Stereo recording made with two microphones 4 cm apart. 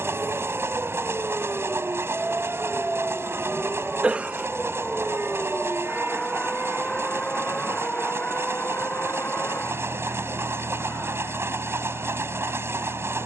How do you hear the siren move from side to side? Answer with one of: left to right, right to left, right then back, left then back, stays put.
right to left.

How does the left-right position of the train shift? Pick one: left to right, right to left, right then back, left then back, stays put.
stays put.